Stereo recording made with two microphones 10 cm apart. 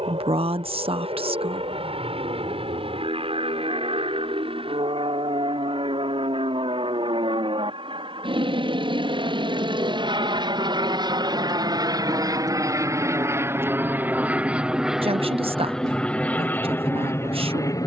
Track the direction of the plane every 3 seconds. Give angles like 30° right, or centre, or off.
70° right, 70° right, 60° right, 50° right, 20° right, 10° left.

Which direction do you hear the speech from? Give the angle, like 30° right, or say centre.
60° right.